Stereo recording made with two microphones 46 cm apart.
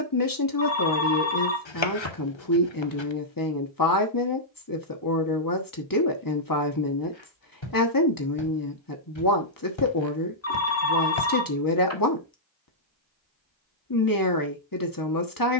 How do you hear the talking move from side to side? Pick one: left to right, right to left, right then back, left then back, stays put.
stays put.